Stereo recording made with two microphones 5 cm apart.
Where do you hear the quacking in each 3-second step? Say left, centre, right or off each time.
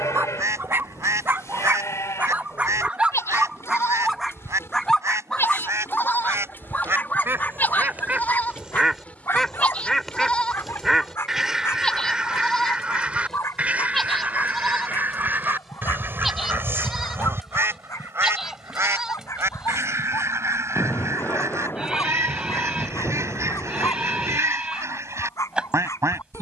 right, right, right, centre, right, right, right, right, right.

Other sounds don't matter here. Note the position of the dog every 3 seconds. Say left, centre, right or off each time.
right, centre, left, left, left, left, left, left, left.